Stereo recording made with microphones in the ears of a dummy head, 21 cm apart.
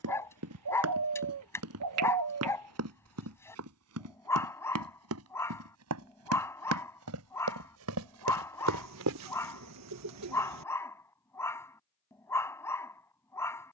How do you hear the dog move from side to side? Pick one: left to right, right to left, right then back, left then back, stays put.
stays put.